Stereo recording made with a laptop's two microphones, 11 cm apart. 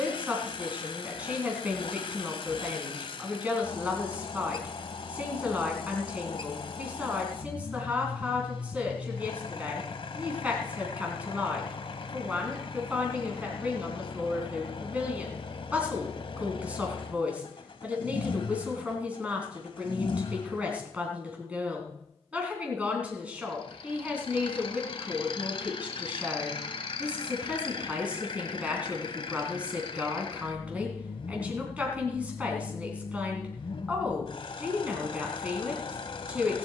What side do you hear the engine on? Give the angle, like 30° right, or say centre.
50° left.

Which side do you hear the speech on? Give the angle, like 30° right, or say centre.
10° right.